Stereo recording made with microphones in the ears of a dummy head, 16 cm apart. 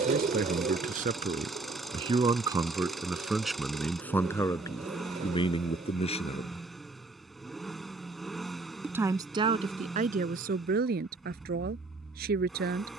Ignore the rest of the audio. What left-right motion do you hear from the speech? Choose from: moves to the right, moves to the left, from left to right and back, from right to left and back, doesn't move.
from right to left and back.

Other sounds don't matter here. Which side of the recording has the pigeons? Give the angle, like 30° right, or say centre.
40° right.